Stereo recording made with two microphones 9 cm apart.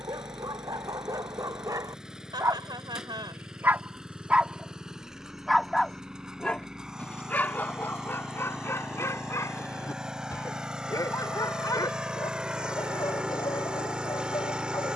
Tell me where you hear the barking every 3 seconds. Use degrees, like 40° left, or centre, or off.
50° right, 10° right, 20° left, 40° left, 50° left.